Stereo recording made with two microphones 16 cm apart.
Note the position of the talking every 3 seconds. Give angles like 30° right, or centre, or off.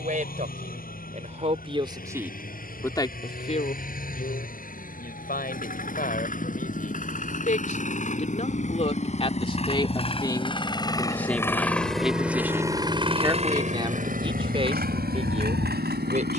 30° right, 60° left, 50° left, 20° left, 20° right, 40° right.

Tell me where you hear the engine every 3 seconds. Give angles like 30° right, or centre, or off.
60° left, 60° left, 50° left, 30° left, 40° right, 80° right.